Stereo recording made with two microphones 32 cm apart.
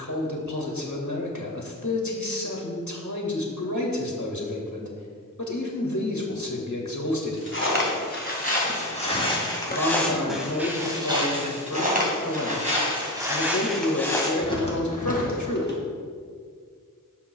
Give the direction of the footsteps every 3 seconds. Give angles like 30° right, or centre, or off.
off, off, 30° left, centre, centre, 30° left.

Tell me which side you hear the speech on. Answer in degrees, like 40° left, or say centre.
60° left.